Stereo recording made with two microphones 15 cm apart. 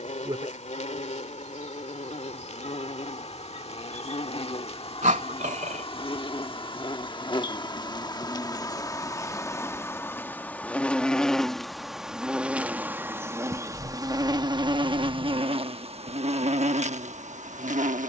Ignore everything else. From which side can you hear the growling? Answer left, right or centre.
right.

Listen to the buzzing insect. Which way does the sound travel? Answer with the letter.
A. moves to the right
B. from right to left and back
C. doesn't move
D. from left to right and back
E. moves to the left
A.